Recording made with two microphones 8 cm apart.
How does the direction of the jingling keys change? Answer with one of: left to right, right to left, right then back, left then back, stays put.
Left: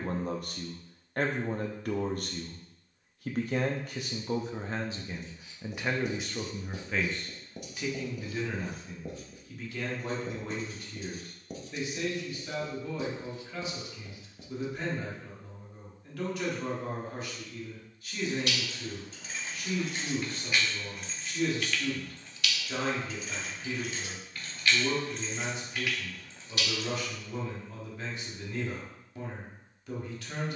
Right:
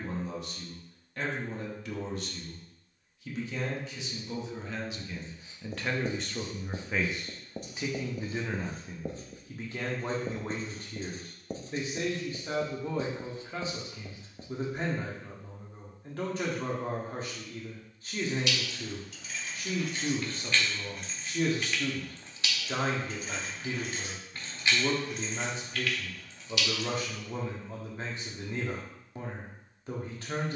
right then back.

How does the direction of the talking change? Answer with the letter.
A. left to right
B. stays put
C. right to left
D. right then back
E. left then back
A.